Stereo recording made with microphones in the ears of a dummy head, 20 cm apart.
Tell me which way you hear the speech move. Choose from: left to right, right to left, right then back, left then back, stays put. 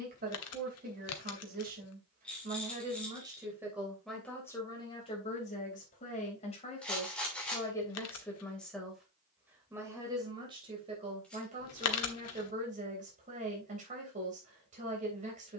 left then back.